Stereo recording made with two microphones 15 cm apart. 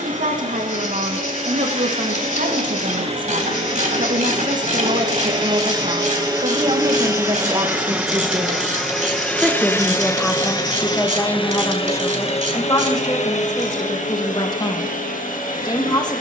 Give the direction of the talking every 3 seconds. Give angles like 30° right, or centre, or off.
70° right, 60° right, 30° right, 10° left, 30° left, 30° left.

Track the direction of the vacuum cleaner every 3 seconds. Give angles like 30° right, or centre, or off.
50° right, 40° right, 10° right, 20° left, 60° left, 70° left.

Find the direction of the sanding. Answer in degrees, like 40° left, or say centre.
60° left.